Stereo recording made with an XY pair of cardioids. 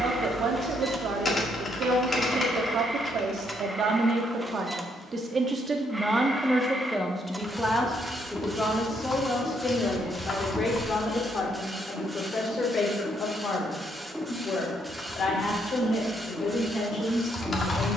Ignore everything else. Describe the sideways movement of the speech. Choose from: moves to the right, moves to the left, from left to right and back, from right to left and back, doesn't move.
moves to the left.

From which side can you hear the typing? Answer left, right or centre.
left.